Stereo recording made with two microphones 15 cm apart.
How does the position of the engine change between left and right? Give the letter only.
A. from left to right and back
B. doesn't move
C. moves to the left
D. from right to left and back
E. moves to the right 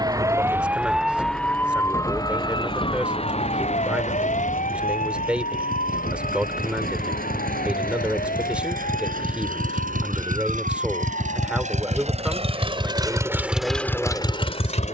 C.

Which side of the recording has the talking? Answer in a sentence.
You can hear the talking in the centre.